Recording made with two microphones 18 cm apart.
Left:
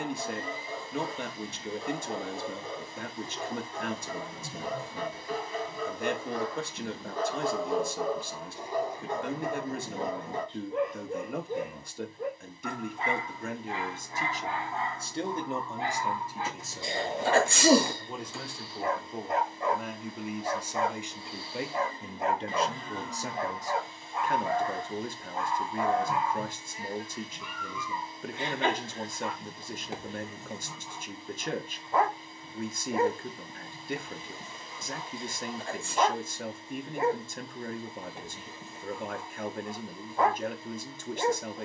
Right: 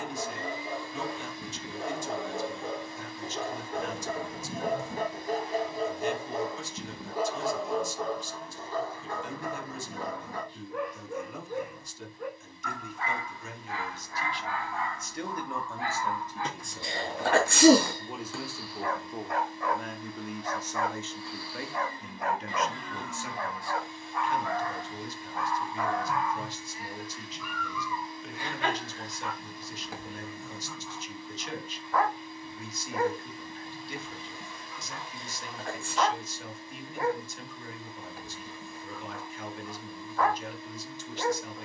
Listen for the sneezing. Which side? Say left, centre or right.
right.